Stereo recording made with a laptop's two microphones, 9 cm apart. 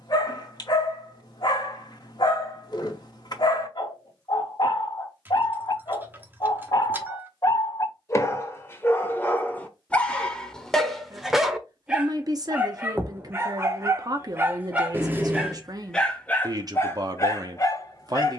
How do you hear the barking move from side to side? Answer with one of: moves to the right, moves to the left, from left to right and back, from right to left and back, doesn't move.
from left to right and back.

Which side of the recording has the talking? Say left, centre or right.
right.